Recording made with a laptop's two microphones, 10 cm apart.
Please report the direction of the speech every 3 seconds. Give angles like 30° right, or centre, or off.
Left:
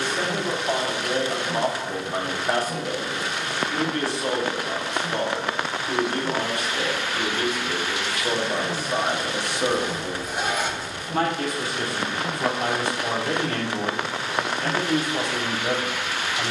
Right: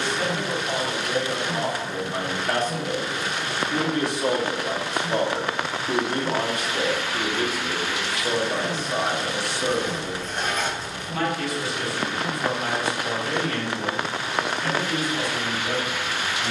30° left, 20° right, 10° right, 30° left, 50° left, 60° left.